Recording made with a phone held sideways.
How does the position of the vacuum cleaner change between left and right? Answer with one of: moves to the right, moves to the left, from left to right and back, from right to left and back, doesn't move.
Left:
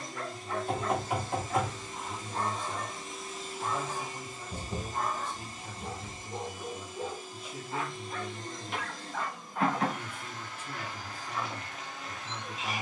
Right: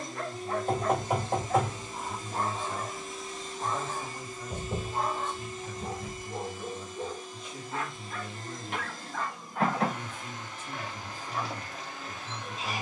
from right to left and back.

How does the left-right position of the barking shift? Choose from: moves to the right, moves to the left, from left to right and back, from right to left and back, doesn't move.
from right to left and back.